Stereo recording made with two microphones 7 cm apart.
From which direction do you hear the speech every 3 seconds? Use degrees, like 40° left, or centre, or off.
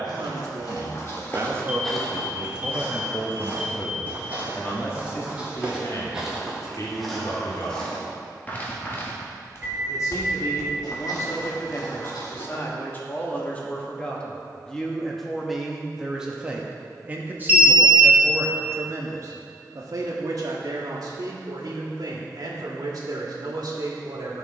30° right, 30° left, 50° left, 40° left, 20° left, 10° right, 50° right, 60° right.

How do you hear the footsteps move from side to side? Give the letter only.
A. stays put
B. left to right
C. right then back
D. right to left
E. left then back
C.